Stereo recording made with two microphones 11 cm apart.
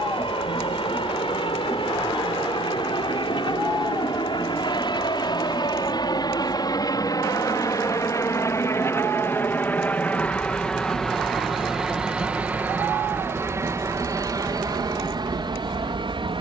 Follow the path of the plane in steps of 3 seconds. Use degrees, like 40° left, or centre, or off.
60° left, 50° left, 30° left, 10° left, 20° right, 40° right.